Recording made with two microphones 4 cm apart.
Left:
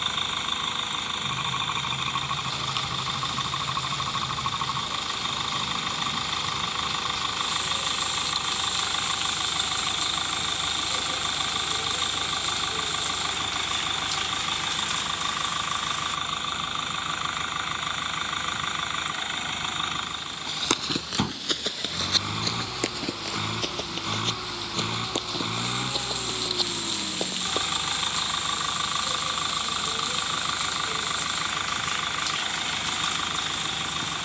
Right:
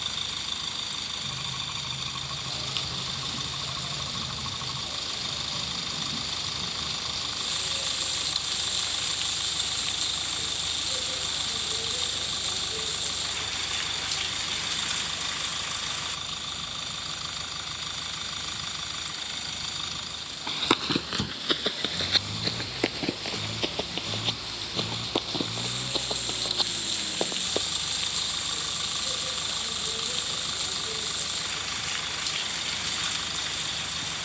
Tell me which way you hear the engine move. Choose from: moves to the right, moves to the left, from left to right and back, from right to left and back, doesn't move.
doesn't move.